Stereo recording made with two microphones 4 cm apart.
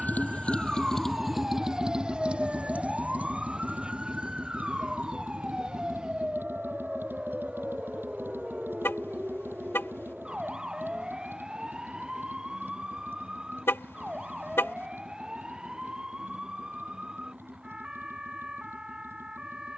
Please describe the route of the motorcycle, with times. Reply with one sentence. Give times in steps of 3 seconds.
In this clip you hear the motorcycle in the centre from 0 s and on the right from 3 s.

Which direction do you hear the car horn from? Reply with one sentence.
You can hear the car horn on the left.